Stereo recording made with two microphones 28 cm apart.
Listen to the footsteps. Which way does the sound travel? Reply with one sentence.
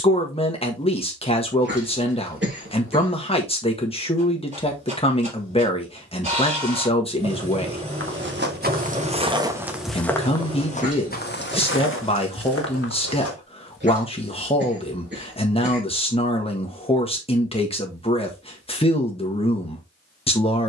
In this clip you hear the footsteps move to the left.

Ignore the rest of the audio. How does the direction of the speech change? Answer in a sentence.
In this clip you hear the speech stay in one place.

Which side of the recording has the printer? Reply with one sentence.
You can hear the printer on the right.